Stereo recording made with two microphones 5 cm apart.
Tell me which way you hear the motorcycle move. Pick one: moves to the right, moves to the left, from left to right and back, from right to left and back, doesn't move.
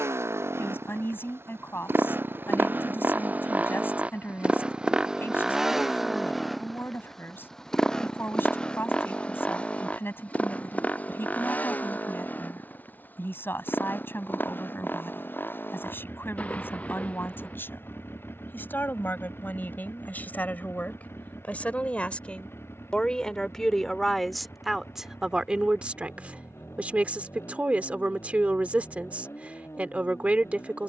moves to the left.